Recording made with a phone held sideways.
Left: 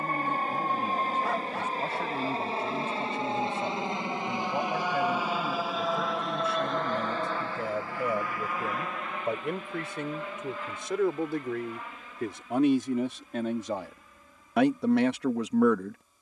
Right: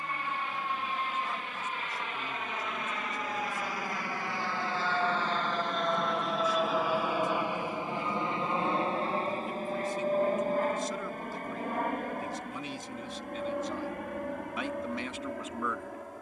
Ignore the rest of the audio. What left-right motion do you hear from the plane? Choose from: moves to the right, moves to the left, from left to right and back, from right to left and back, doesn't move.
moves to the right.